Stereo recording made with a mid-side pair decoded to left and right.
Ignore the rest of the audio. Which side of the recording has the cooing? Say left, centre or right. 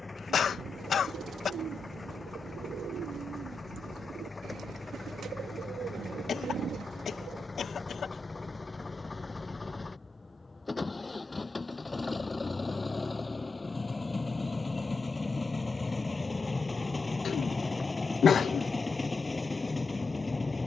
right.